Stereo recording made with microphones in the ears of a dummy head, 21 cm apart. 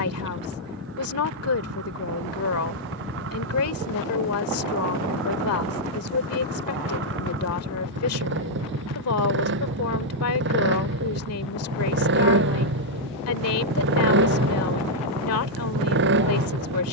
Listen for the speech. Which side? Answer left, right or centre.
left.